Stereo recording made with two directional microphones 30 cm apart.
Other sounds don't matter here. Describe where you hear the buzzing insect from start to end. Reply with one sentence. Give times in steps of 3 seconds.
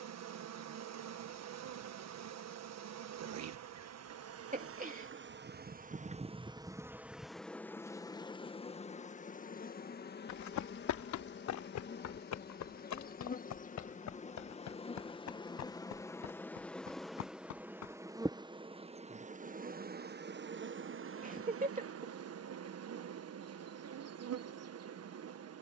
You can hear the buzzing insect on the right from 0 s, in the centre from 6 s, on the left from 9 s, in the centre from 15 s and on the right from 18 s.